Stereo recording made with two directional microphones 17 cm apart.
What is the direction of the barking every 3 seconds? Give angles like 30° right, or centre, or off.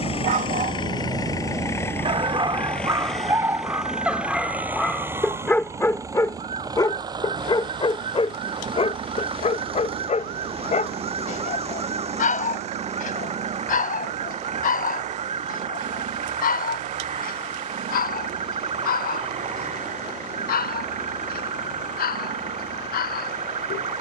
40° right, centre, 30° left, 40° left, 50° left, 60° left, 60° left, 60° left.